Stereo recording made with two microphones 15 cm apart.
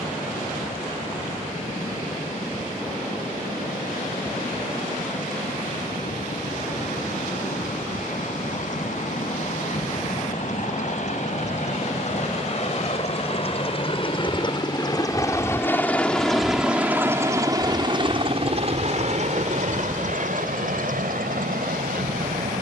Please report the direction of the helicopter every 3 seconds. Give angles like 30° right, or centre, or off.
70° left, 70° left, 70° left, 60° left, 40° left, centre, 50° right, 70° right.